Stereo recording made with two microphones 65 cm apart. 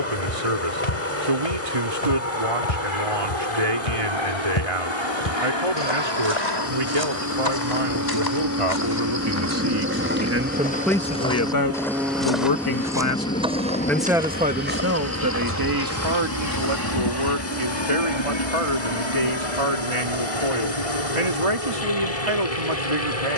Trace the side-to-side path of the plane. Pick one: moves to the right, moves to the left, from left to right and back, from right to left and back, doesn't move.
moves to the left.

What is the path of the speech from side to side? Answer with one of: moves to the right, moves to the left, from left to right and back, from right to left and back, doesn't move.
from right to left and back.